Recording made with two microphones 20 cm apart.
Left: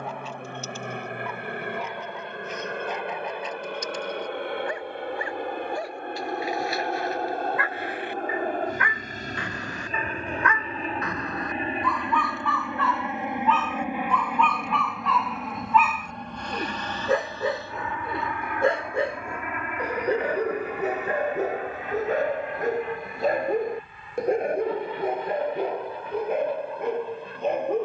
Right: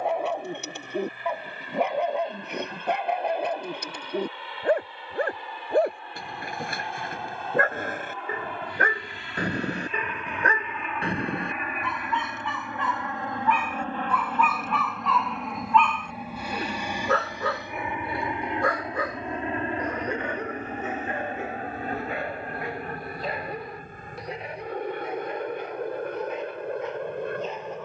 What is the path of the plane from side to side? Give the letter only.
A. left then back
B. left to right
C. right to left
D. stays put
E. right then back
B.